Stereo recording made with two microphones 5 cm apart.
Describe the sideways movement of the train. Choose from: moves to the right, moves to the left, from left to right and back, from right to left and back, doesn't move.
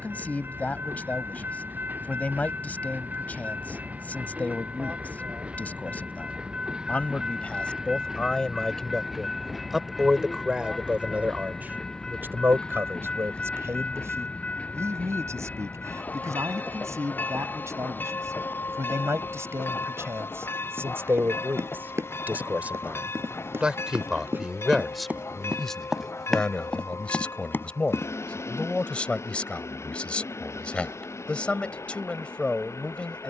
moves to the left.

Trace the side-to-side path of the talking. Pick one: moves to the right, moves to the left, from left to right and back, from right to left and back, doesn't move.
from left to right and back.